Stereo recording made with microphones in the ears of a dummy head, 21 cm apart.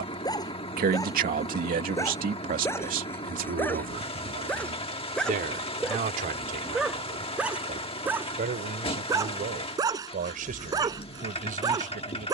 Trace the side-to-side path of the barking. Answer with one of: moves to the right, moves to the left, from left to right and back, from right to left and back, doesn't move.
moves to the right.